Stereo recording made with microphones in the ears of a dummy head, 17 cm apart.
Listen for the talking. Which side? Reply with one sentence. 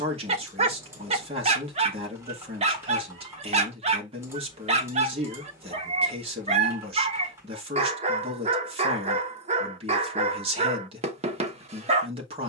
You can hear the talking on the right.